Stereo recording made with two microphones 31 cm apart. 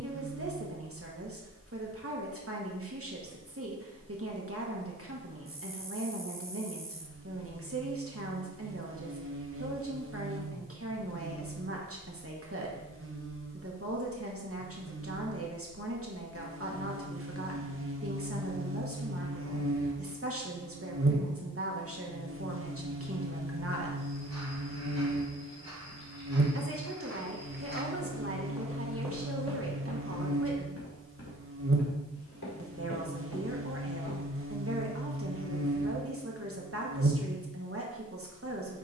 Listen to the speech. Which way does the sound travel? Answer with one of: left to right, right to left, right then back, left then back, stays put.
stays put.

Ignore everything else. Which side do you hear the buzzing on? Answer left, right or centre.
right.